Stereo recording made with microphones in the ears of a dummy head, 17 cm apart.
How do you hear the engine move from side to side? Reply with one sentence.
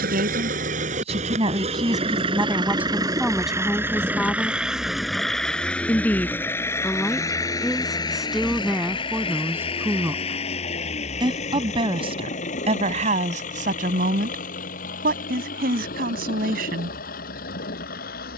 In this clip you hear the engine move from right to left.